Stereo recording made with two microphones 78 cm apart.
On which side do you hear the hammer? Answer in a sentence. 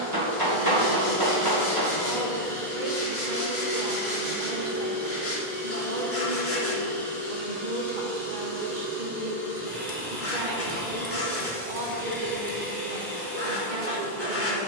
You can hear the hammer on the right.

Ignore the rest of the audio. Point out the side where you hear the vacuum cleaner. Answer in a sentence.
In this clip you hear the vacuum cleaner on the right.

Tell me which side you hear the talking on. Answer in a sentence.
You can hear the talking on the right.